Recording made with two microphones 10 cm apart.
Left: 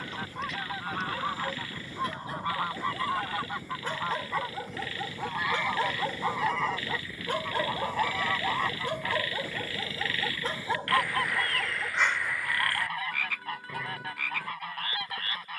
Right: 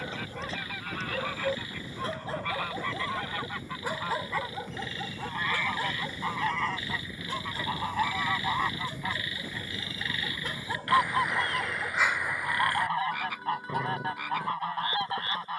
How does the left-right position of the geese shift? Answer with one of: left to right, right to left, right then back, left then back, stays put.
left to right.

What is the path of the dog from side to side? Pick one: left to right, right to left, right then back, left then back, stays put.
left then back.